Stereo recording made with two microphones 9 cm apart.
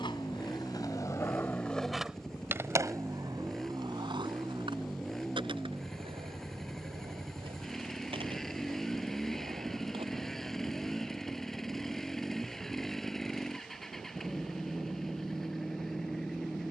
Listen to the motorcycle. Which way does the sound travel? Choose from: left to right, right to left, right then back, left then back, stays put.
stays put.